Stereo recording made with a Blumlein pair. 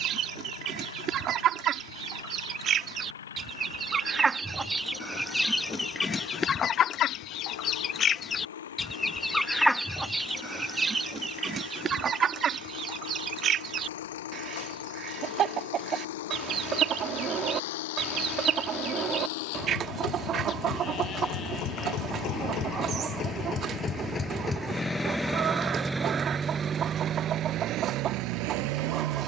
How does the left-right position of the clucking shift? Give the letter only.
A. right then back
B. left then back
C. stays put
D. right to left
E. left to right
B.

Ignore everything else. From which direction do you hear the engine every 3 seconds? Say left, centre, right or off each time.
left, left, left, left, left, left, left, left, centre, right.